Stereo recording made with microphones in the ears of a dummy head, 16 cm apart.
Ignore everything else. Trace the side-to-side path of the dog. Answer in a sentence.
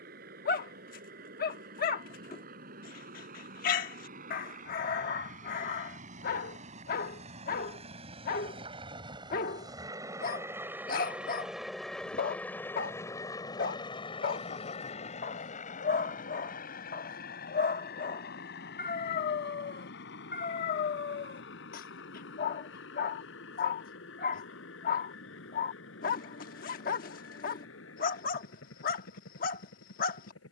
In this clip you hear the dog stay put.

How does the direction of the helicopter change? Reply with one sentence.
In this clip you hear the helicopter move from right to left.